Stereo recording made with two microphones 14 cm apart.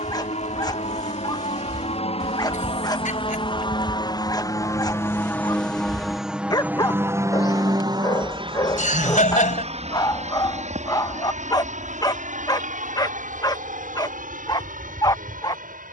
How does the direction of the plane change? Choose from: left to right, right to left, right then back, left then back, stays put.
left to right.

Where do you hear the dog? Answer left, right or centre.
left.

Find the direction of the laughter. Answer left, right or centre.
left.